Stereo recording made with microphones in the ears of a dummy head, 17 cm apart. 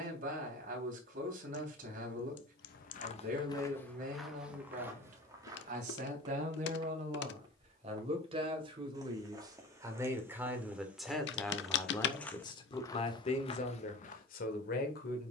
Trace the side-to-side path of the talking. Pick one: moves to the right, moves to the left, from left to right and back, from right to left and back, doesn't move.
moves to the left.